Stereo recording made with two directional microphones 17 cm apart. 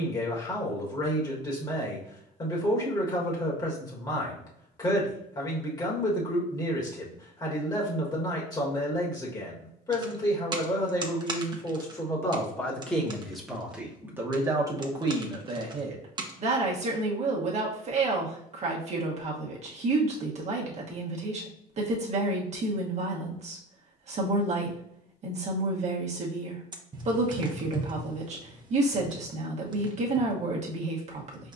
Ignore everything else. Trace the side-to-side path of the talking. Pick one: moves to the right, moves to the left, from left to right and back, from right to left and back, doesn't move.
moves to the right.